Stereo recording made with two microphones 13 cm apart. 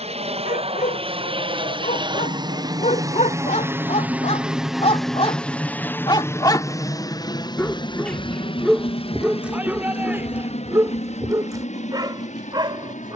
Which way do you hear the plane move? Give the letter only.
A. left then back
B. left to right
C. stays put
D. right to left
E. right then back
D.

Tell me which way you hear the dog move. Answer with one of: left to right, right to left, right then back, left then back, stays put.
left to right.